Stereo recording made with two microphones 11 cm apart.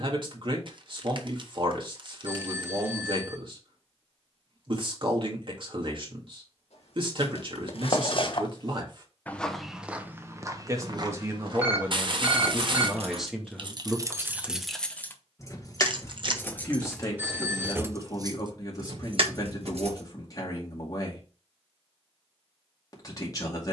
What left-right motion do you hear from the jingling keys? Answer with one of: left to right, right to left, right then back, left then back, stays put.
left then back.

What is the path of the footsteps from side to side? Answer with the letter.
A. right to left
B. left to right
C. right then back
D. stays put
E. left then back
B.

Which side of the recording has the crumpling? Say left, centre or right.
right.